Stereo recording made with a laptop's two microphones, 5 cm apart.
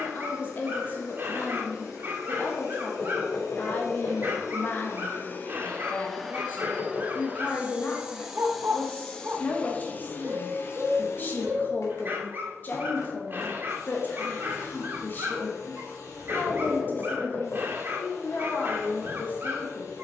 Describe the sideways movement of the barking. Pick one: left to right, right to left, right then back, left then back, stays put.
stays put.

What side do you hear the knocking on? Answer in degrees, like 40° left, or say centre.
60° left.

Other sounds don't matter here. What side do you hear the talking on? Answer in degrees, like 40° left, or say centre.
40° left.